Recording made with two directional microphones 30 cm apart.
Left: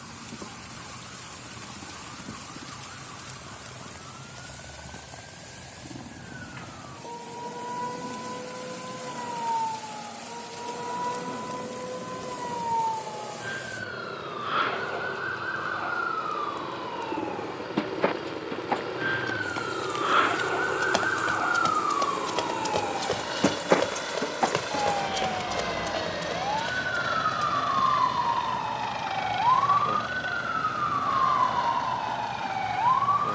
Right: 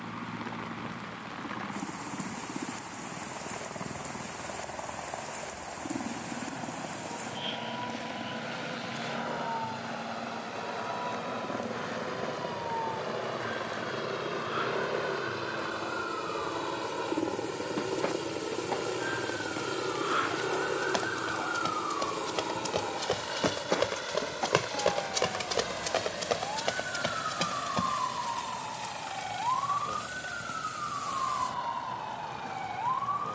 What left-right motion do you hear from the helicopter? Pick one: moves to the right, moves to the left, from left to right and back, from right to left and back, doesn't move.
moves to the left.